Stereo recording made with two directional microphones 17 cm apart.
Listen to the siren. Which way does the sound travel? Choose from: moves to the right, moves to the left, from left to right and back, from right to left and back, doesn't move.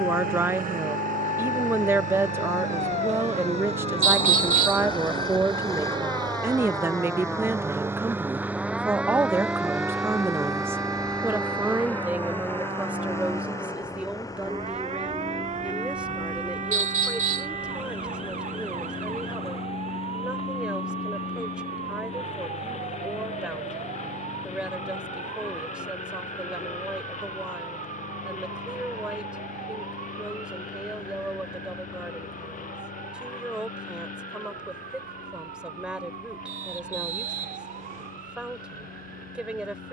moves to the right.